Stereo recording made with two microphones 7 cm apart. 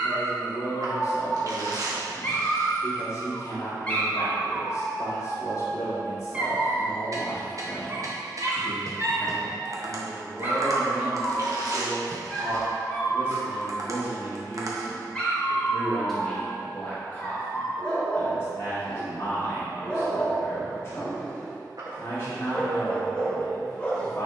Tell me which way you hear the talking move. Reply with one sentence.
You can hear the talking go right and come back.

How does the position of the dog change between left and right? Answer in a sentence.
You can hear the dog move from left to right and back again.